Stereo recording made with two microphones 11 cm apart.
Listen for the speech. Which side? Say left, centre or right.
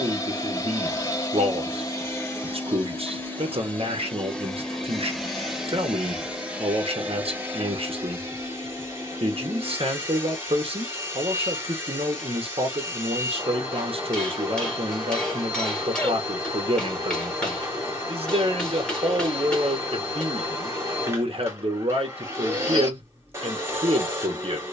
right.